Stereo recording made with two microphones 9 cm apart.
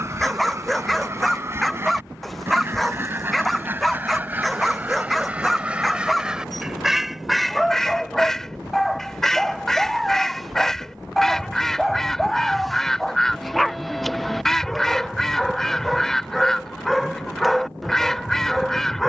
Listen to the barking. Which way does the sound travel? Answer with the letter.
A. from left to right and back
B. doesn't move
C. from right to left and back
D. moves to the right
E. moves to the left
B.